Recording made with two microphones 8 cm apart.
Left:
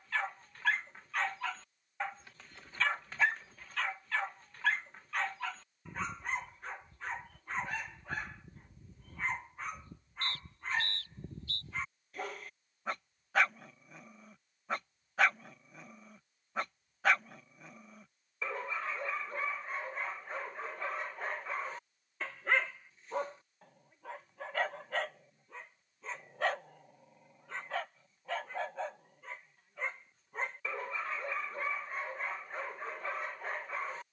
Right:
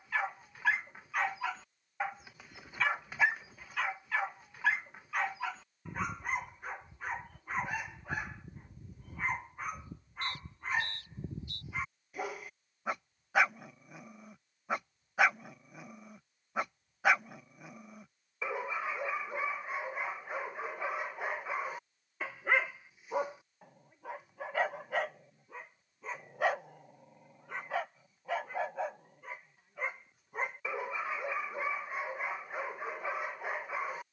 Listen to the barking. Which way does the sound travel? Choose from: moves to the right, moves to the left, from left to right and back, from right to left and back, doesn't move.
doesn't move.